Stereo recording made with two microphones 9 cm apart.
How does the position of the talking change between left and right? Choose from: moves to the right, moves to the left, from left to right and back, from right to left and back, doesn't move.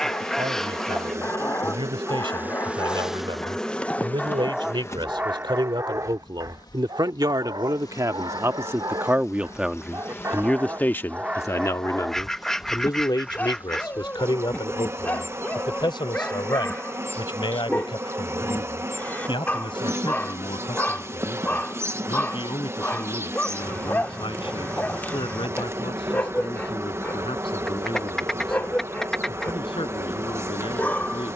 moves to the left.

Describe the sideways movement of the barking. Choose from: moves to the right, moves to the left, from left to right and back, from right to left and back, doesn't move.
from left to right and back.